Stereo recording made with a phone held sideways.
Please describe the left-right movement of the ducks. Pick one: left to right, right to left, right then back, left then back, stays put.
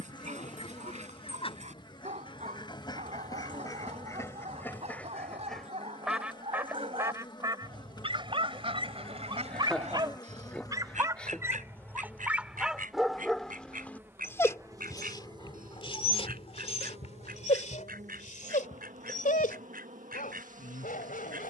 left to right.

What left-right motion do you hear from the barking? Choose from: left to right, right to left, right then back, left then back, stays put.
right to left.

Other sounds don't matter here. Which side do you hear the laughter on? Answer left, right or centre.
centre.